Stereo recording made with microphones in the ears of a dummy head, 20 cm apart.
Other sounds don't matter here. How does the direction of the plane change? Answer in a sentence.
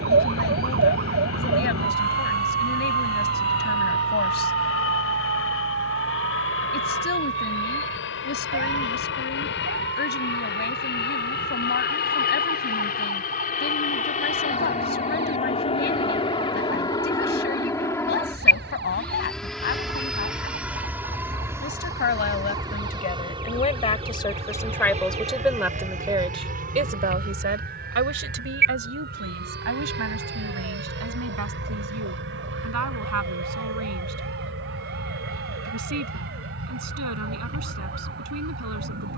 You can hear the plane go from the left side to the right.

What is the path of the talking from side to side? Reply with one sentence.
You can hear the talking go from the left side to the right.